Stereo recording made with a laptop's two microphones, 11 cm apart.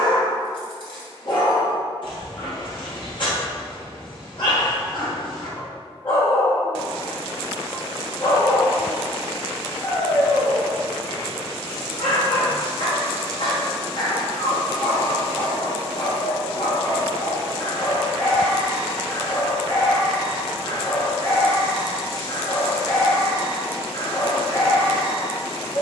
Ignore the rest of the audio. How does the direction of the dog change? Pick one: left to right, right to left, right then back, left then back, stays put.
stays put.